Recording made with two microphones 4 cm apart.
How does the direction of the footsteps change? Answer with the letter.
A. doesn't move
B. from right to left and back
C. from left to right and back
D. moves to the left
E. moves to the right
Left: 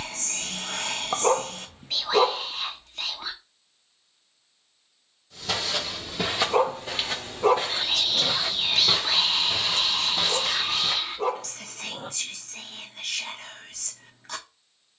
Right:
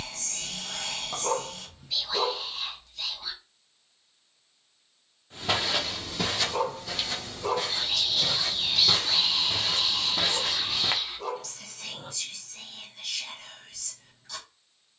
B.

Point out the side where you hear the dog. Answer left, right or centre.
left.